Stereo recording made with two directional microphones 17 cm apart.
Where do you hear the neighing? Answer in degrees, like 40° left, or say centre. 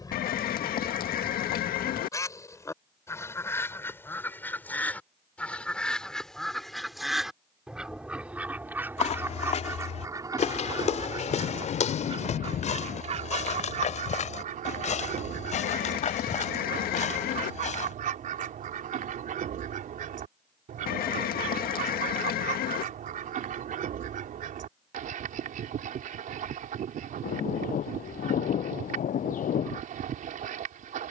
60° left.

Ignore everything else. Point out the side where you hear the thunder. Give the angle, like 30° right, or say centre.
50° left.